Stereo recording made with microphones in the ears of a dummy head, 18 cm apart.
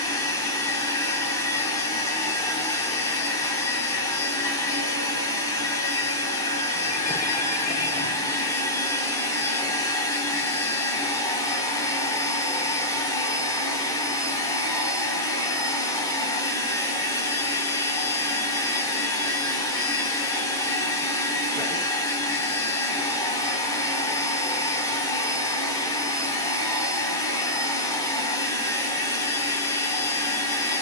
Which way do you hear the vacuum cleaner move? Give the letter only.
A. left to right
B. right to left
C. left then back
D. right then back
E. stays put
E.